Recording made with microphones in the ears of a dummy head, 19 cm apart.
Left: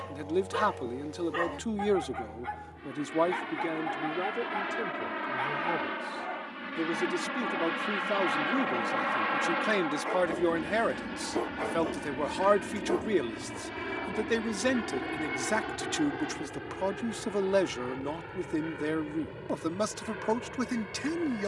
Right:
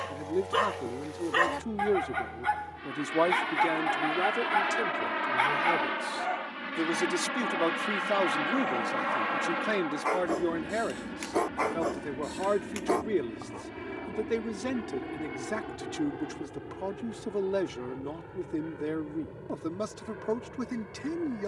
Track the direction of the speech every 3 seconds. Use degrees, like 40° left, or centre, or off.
30° left, 40° right, 20° right, 20° left, 40° left, 40° left, 40° left.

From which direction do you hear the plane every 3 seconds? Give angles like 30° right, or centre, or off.
40° right, 30° right, 10° right, 20° left, 40° left, 50° left, 60° left.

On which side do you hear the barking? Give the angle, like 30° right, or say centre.
40° right.